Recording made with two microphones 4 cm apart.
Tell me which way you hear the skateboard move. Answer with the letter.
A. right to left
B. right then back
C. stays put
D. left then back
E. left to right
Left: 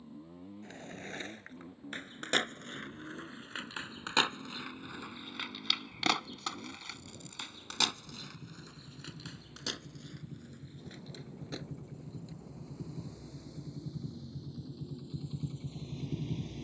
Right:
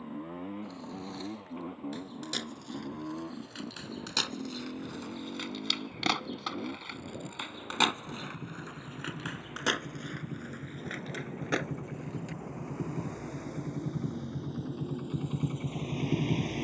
E.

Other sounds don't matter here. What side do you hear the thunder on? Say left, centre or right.
right.